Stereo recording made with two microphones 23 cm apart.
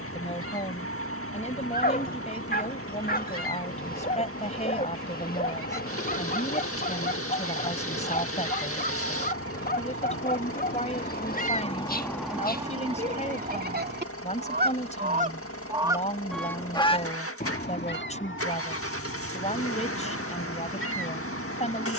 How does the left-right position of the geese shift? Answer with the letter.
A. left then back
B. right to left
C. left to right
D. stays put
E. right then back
E.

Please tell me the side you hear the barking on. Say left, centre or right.
left.